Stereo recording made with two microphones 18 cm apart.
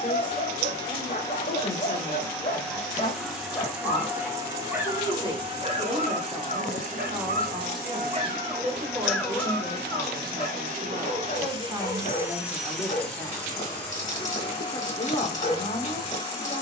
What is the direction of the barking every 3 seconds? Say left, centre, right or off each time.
left, centre, right, left, left, left.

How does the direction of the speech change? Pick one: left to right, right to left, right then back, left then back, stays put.
right then back.